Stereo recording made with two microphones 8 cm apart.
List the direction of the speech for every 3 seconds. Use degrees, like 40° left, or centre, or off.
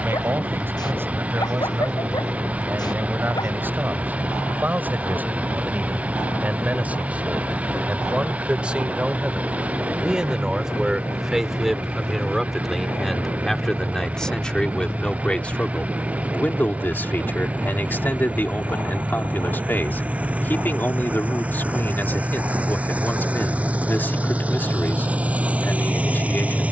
30° right, 20° right, 20° right, 10° right, centre, 20° left, 20° left, 20° left, 20° left.